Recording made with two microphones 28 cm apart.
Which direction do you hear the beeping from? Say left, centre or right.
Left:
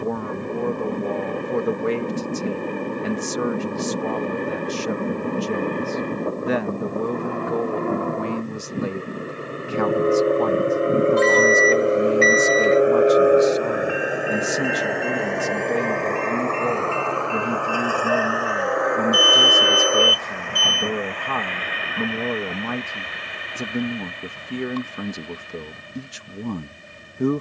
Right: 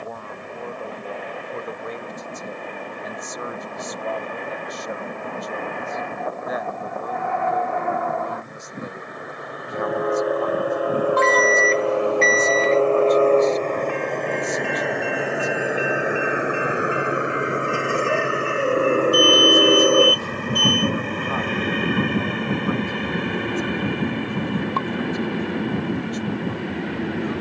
right.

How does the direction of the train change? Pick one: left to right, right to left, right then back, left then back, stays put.
left to right.